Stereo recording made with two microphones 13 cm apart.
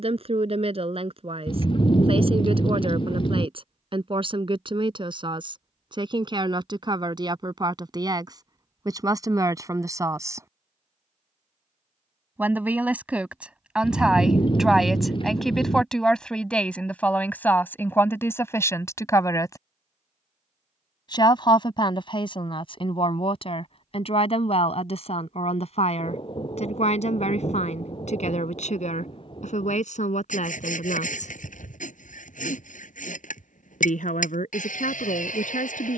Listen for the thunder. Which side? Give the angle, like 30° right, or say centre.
40° left.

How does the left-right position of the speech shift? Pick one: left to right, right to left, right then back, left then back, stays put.
right to left.